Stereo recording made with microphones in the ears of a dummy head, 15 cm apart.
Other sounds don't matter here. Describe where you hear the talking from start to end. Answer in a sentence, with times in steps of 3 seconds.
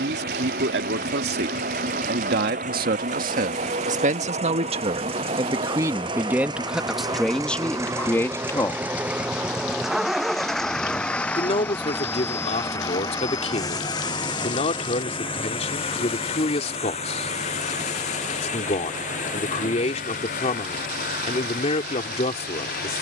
In this clip you hear the talking on the right from 0 s, in the centre from 6 s and on the left from 9 s.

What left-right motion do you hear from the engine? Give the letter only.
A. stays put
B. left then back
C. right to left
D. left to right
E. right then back
C.